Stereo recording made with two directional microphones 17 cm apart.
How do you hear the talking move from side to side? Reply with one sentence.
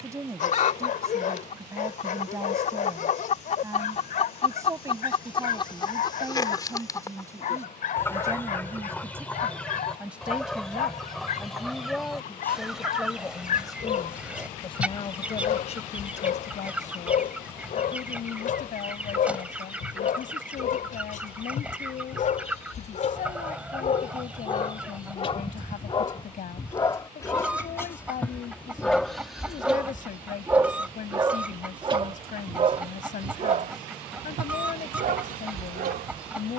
In this clip you hear the talking travel towards the left.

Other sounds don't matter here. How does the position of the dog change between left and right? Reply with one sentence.
You can hear the dog travel towards the right.